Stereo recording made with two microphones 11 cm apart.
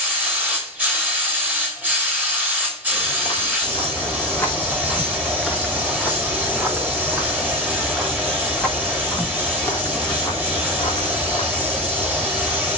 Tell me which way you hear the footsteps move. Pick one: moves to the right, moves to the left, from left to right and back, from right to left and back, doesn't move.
from left to right and back.